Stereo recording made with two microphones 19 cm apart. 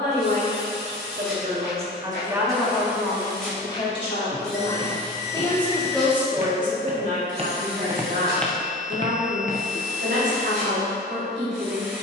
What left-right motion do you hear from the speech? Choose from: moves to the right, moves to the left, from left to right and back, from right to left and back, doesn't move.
from right to left and back.